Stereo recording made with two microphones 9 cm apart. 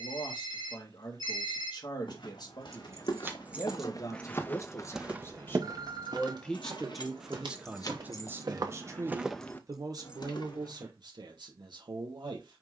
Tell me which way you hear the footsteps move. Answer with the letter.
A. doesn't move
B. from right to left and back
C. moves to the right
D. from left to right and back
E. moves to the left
D.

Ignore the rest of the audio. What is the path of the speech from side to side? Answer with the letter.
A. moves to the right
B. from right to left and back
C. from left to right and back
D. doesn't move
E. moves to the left
A.